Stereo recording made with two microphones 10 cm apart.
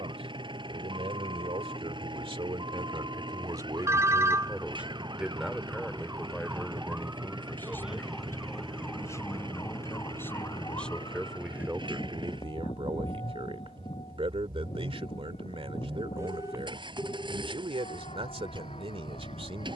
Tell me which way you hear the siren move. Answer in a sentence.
You can hear the siren travel towards the left.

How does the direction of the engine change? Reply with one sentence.
You can hear the engine stay in one place.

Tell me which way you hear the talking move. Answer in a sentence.
In this clip you hear the talking move from right to left and back again.